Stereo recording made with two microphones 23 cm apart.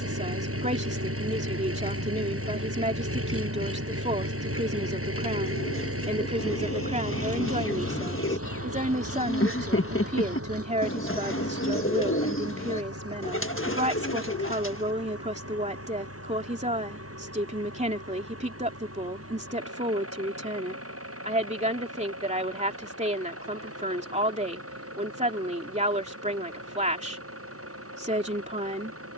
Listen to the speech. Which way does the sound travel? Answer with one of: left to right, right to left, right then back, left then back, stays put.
stays put.